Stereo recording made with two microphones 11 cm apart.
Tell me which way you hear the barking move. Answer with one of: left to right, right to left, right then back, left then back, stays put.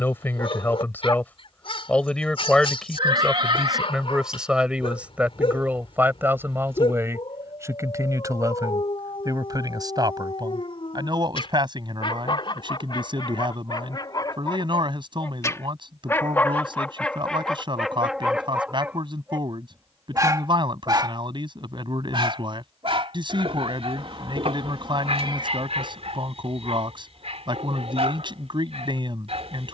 left to right.